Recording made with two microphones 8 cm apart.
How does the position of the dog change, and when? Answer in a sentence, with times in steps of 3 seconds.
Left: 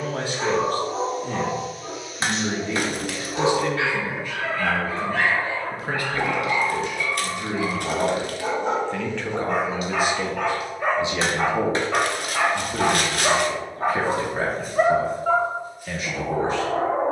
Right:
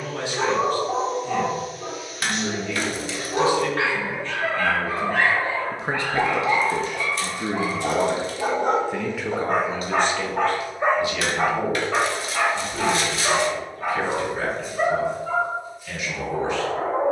In this clip you hear the dog on the right from 0 s and on the left from 12 s.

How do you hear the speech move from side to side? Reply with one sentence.
In this clip you hear the speech move from left to right and back again.